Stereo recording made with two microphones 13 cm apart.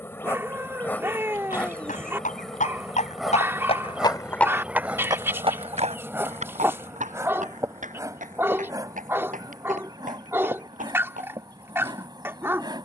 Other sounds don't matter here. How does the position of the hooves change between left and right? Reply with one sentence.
In this clip you hear the hooves travel towards the right.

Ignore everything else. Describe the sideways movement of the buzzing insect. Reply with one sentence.
You can hear the buzzing insect travel towards the right.